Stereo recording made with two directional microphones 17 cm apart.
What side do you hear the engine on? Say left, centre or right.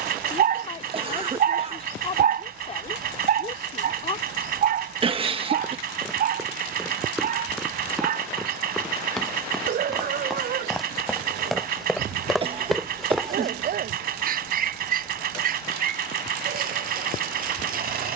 right.